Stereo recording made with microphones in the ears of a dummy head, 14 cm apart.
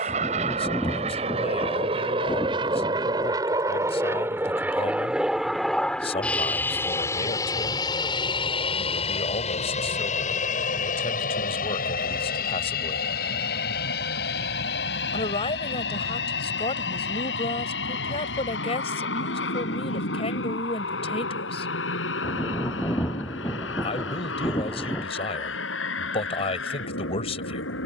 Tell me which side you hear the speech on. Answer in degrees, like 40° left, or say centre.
40° left.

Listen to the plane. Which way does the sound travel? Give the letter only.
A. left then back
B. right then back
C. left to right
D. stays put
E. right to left
E.